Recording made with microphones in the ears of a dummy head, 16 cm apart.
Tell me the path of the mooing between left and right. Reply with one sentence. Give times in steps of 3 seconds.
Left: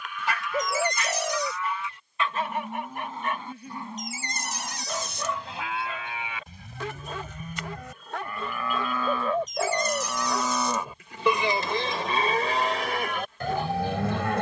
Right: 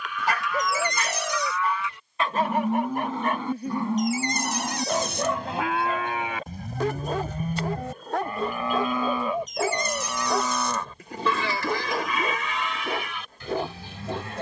In this clip you hear the mooing on the right from 0 s, in the centre from 9 s and on the left from 12 s.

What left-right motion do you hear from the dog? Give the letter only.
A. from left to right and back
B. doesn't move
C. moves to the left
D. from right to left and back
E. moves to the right
B.